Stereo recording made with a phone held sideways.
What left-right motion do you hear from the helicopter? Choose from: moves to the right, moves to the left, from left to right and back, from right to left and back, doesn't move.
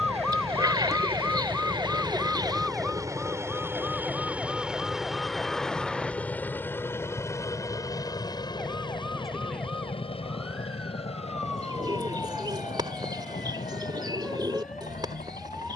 moves to the left.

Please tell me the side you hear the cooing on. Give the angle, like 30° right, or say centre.
30° right.